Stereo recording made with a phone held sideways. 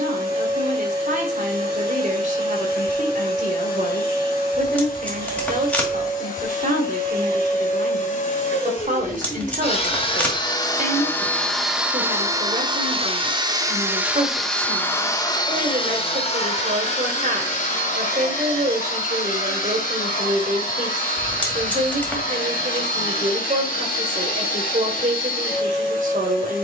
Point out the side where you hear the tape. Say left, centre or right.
centre.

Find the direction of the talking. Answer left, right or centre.
right.